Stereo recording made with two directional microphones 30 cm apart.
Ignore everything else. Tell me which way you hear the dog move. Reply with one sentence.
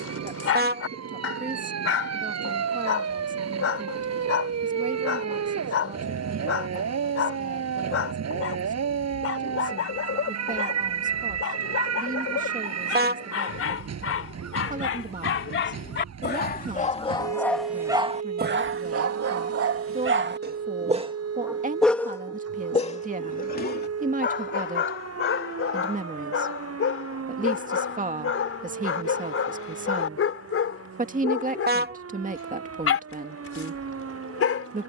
You can hear the dog go right and come back.